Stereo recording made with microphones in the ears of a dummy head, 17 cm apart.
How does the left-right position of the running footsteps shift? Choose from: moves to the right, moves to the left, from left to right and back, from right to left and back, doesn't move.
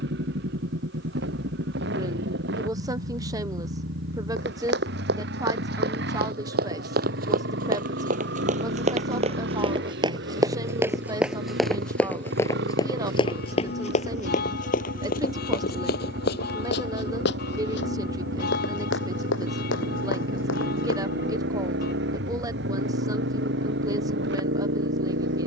moves to the left.